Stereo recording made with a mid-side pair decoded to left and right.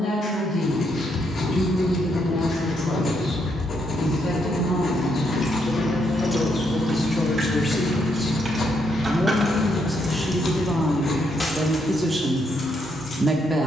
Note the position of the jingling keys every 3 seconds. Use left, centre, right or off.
off, left, right, centre, left.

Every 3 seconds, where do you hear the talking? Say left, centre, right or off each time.
left, left, left, centre, right.